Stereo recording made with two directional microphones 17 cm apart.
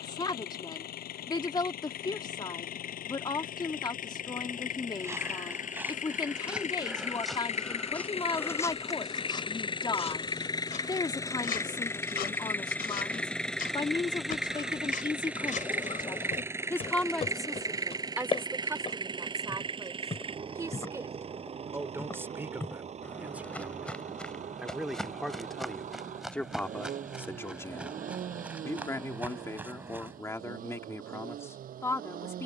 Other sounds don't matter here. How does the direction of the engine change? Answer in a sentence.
In this clip you hear the engine travel towards the right.